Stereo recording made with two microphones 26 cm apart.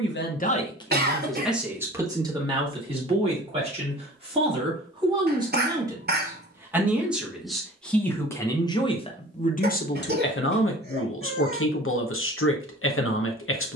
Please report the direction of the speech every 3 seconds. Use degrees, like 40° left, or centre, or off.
centre, 20° right, centre, 40° left, 50° left.